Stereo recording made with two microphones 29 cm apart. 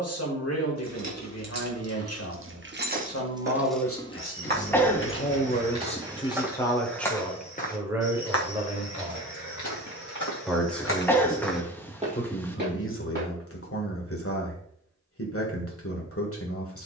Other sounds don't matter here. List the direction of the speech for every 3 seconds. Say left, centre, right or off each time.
left, left, centre, centre, left, left.